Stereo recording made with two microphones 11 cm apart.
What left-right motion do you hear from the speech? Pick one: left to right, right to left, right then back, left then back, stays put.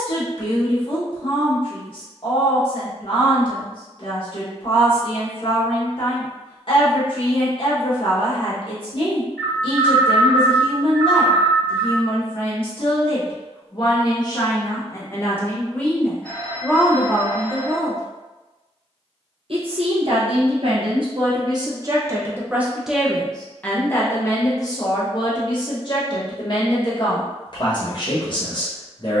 right then back.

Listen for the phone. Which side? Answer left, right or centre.
centre.